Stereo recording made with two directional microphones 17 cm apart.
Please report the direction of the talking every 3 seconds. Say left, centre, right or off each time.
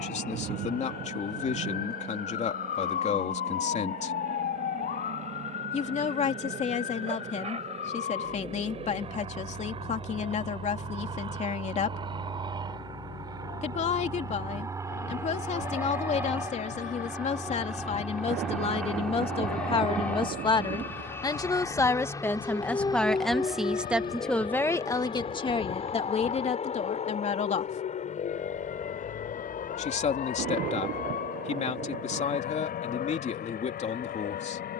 left, left, left, left, left, left, left, centre, left, left, left, left.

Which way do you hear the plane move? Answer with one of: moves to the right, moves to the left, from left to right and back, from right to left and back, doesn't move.
moves to the left.